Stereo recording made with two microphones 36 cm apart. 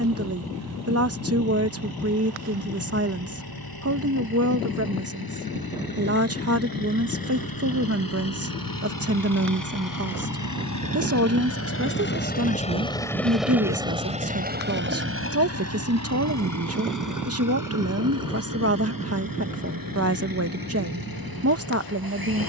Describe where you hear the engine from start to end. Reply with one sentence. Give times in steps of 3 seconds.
In this clip you hear the engine on the left from 0 s, in the centre from 12 s and on the right from 15 s.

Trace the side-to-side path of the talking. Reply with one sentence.
In this clip you hear the talking stay in one place.